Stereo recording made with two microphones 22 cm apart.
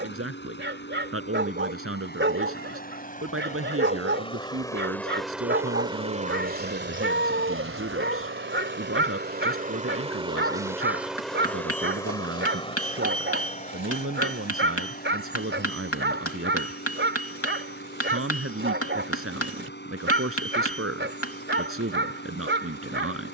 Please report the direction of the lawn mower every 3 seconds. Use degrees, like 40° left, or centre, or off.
50° left, 10° left, 50° right, 20° right, 30° left, 50° left, 50° left, 50° left.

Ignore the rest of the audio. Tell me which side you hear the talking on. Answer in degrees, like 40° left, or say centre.
70° right.